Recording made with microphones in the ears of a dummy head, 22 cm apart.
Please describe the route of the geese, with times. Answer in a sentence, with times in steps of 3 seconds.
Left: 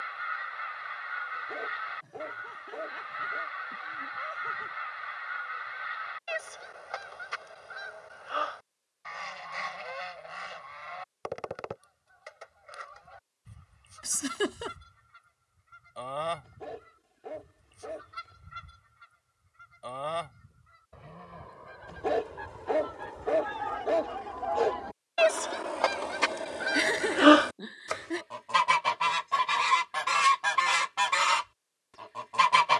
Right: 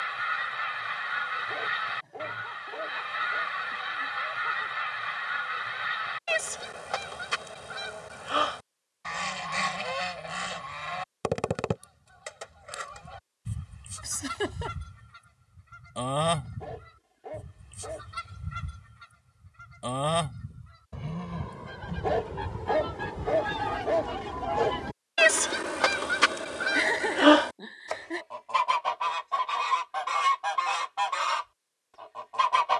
You can hear the geese on the right from 0 s and on the left from 27 s.